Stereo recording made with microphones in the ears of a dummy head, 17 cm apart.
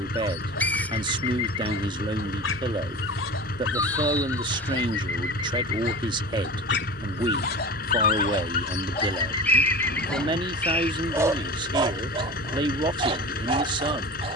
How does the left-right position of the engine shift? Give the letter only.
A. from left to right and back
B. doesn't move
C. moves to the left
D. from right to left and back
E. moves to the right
B.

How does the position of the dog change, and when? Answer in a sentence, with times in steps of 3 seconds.
In this clip you hear the dog on the left from 0 s, in the centre from 9 s and on the right from 12 s.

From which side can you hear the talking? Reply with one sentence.
You can hear the talking on the right.